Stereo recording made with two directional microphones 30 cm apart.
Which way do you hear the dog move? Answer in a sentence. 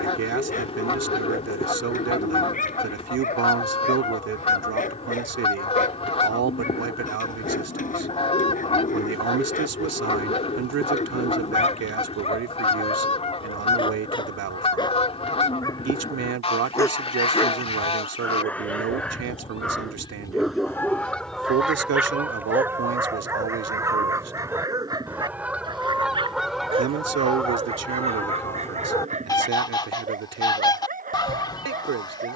You can hear the dog move to the right.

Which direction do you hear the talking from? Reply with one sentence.
You can hear the talking on the right.